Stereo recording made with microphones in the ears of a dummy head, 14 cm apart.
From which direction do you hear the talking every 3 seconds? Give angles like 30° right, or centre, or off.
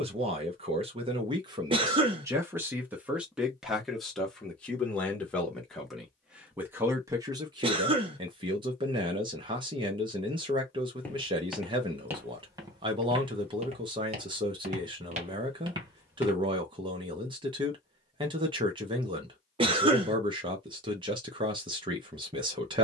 30° right, centre, 20° right, 30° right, 30° right, 30° right, 30° right, 30° right.